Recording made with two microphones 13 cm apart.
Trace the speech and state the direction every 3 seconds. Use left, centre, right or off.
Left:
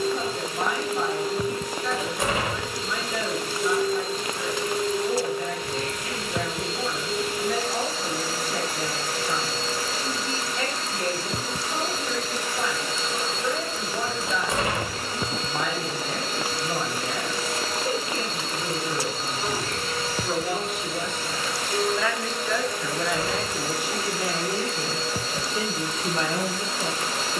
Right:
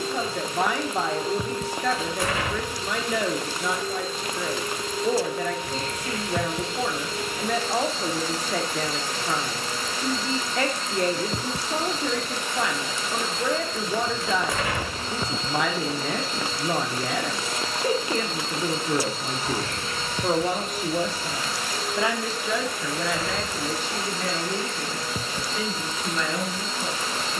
right, right, right, right, right, right, right, centre, left.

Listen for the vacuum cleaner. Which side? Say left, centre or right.
left.